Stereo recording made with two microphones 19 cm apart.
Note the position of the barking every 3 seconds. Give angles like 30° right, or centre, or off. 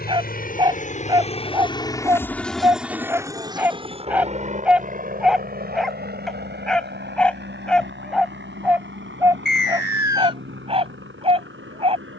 20° right, 10° right, centre, 30° right.